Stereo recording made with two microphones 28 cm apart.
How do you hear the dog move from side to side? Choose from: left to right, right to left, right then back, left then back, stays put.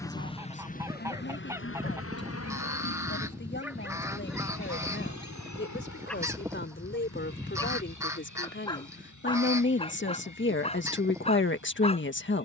right to left.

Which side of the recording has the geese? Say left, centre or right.
centre.